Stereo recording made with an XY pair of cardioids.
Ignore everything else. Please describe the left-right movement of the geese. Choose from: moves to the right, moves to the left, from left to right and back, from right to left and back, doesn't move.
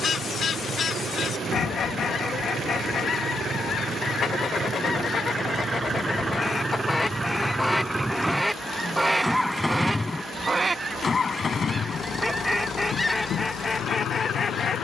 from left to right and back.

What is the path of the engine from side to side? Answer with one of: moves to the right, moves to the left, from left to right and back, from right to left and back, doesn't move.
moves to the left.